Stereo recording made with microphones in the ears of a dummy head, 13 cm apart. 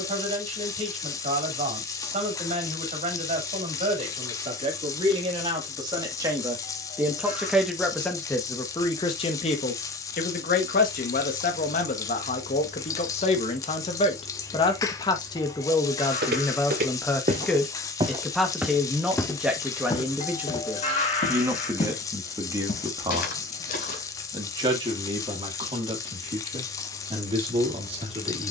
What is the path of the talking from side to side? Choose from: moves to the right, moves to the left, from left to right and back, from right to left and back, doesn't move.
from right to left and back.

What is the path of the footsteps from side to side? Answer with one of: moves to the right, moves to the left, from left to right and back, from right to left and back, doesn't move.
moves to the left.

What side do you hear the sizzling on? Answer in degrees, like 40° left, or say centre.
20° left.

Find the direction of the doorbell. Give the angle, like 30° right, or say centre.
50° left.